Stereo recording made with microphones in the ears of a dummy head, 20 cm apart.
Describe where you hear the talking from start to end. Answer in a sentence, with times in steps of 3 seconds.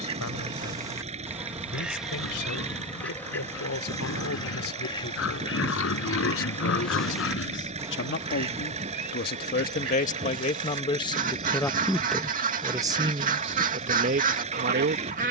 In this clip you hear the talking on the left from 0 s and on the right from 12 s.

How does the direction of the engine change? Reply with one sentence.
In this clip you hear the engine stay put.